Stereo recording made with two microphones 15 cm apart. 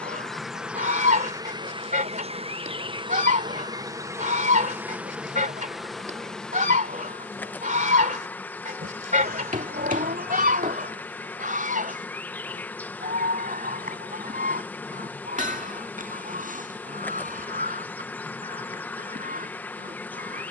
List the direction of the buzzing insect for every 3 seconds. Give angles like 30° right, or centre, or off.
20° right, 20° right, 10° left, 10° left, 10° left, 10° left, 10° left.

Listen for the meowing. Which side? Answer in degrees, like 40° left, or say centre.
80° right.